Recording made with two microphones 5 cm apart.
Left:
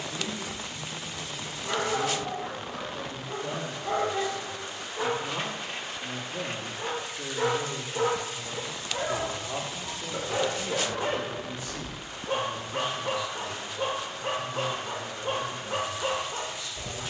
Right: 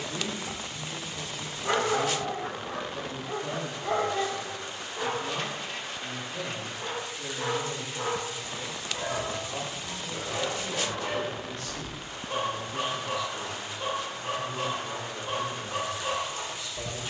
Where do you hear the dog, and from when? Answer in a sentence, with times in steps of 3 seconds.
You can hear the dog on the right from 0 s, in the centre from 3 s and on the left from 6 s.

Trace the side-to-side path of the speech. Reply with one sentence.
You can hear the speech go left and come back.